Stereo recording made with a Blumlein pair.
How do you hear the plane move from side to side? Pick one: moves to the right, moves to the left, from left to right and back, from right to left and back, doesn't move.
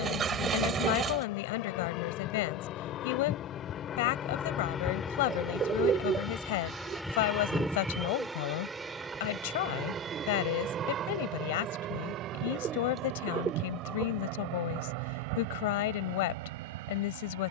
moves to the right.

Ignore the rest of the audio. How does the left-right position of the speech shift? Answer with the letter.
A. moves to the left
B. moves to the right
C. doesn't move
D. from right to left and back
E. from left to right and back
C.